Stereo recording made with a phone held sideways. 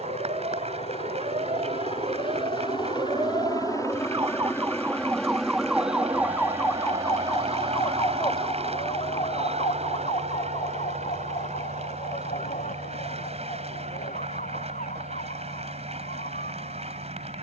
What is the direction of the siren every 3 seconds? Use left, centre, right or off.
right, right, left, left, left, left.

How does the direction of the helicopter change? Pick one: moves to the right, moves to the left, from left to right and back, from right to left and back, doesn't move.
moves to the right.